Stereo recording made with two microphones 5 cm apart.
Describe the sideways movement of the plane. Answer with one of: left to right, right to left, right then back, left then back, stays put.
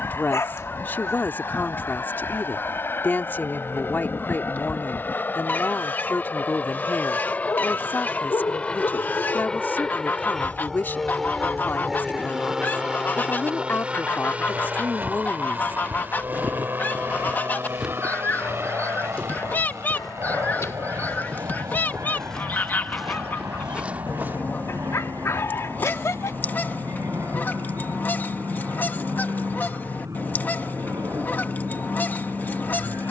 left to right.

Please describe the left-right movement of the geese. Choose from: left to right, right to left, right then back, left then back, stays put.
stays put.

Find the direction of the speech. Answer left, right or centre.
left.